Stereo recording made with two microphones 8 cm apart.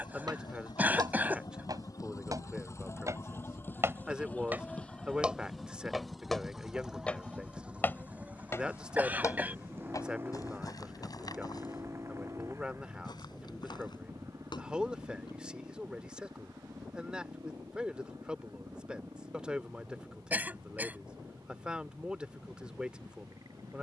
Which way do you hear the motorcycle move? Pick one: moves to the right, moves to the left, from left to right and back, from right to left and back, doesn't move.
moves to the right.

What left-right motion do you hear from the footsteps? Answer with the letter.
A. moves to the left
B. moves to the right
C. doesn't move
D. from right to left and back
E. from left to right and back
A.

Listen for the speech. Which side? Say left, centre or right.
centre.